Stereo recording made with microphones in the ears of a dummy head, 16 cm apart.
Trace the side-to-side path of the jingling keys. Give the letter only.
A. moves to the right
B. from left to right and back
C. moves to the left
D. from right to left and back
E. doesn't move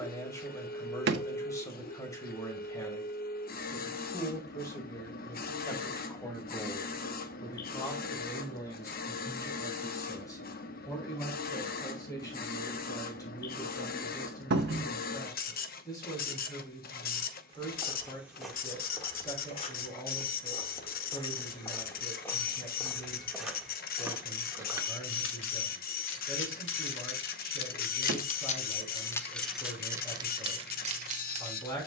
A.